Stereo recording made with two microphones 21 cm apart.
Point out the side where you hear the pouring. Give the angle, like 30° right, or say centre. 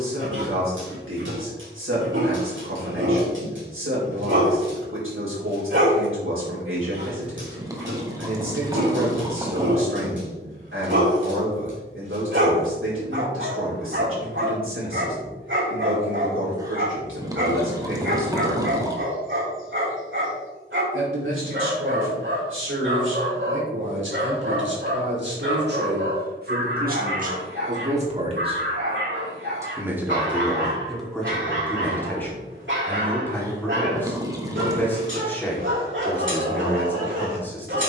20° right.